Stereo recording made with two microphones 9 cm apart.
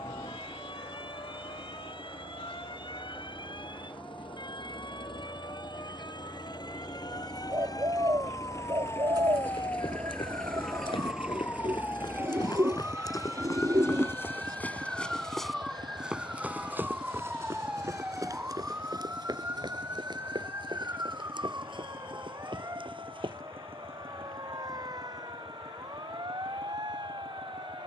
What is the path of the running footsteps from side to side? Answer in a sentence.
In this clip you hear the running footsteps move from left to right.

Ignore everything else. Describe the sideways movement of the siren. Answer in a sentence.
In this clip you hear the siren move to the right.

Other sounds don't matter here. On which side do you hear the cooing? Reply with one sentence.
You can hear the cooing on the right.